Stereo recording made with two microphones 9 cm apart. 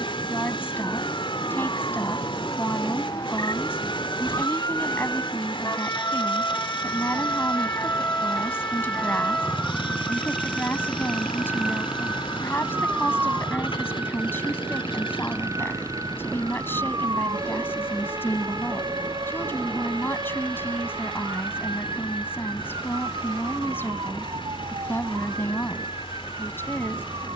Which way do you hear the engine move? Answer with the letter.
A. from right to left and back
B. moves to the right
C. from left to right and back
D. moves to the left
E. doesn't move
E.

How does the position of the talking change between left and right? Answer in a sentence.
In this clip you hear the talking stay in one place.